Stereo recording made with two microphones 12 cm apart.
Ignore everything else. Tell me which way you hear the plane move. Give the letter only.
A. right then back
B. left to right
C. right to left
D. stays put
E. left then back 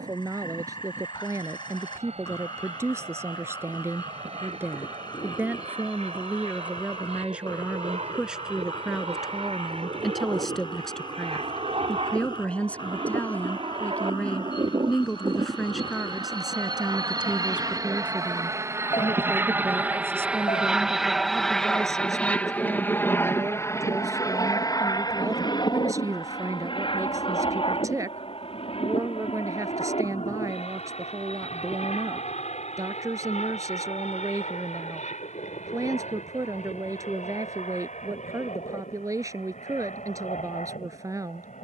C.